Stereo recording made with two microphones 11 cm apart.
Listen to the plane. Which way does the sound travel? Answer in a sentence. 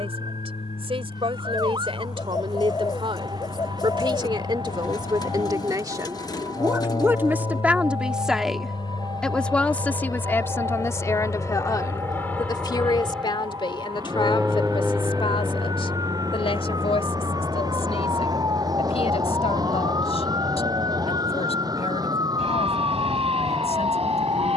You can hear the plane go from the left side to the right.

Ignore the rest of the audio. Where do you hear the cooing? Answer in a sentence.
In this clip you hear the cooing on the left.